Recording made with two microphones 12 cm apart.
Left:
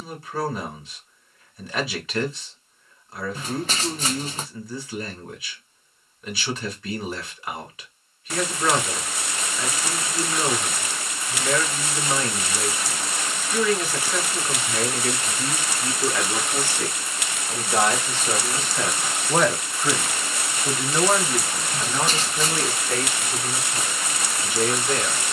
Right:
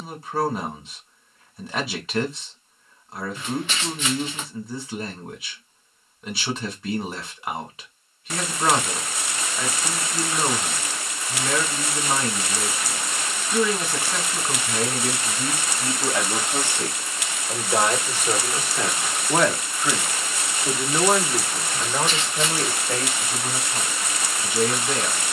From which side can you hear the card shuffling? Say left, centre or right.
left.